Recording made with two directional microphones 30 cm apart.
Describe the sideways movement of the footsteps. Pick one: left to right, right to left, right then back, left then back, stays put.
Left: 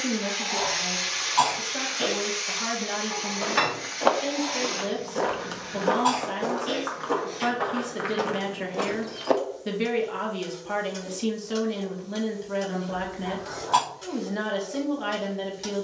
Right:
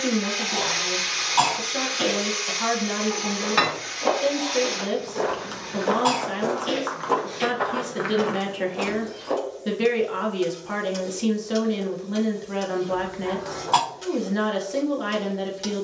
right then back.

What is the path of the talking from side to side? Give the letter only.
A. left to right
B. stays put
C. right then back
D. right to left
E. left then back
B.